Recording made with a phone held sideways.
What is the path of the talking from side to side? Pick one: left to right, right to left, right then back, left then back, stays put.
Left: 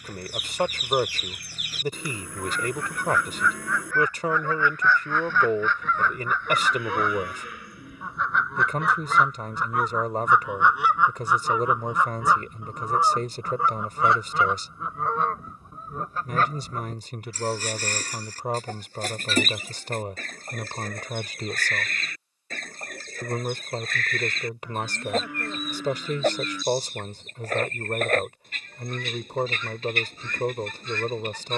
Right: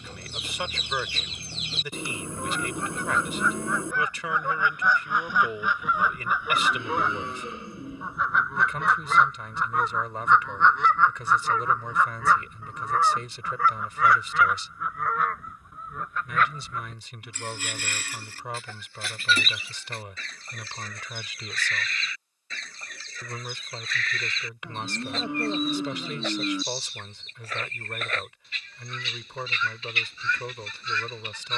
stays put.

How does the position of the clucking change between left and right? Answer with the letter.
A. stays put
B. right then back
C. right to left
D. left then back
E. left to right
C.